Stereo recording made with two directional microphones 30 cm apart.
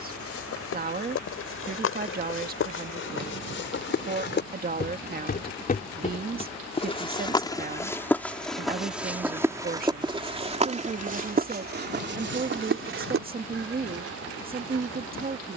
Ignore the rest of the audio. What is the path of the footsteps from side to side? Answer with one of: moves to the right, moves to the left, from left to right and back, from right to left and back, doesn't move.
moves to the right.